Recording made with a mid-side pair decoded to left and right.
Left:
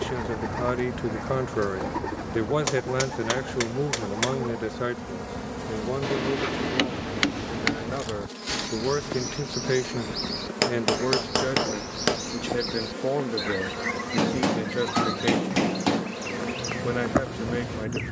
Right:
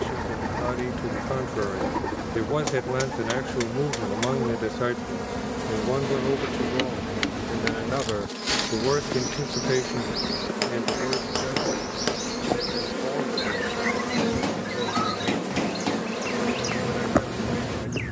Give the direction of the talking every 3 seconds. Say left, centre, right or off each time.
left, centre, right, left, left, left.